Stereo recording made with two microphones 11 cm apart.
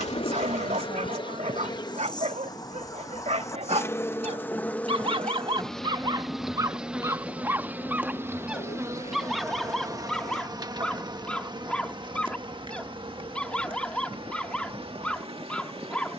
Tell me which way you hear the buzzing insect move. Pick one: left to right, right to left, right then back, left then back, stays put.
left to right.